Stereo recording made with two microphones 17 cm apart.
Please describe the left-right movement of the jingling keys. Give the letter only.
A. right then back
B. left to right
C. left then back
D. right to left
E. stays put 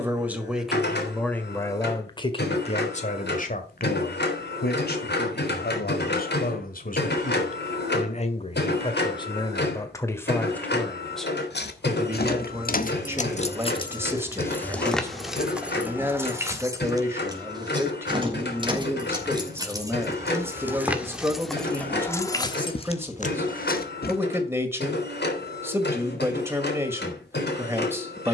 A.